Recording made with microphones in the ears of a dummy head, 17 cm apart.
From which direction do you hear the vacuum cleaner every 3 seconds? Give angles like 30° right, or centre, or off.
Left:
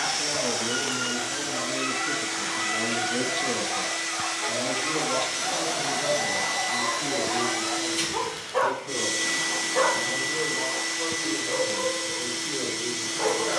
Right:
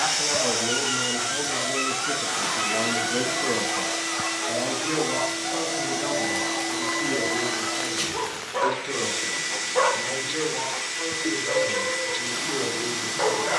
20° right, 10° left, 20° left, 30° left, 30° left.